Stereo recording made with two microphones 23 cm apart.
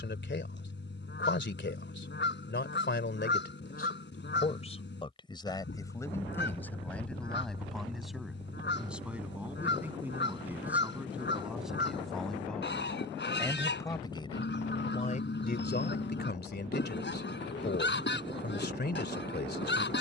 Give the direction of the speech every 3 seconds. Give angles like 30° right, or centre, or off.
50° left, 30° left, centre, 10° right, 10° left, 40° left, 50° left.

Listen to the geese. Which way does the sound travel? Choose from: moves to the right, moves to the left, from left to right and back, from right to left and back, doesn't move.
doesn't move.